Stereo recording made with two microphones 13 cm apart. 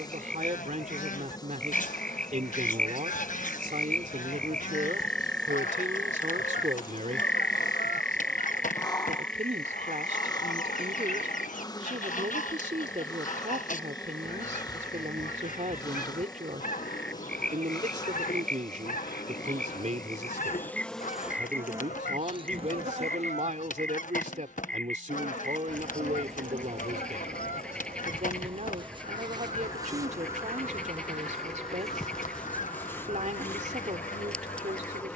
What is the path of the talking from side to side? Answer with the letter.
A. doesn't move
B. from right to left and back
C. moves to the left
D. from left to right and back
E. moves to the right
A.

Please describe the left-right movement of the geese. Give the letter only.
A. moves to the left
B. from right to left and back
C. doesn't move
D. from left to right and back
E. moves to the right
C.